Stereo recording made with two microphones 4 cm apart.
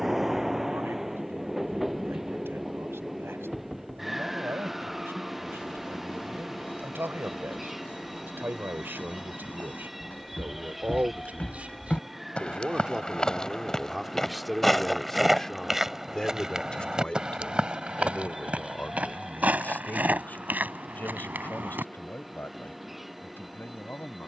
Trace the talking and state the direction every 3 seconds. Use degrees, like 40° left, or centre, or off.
80° right, 70° right, 60° right, 40° right, 10° right, 20° left, 40° left, 50° left.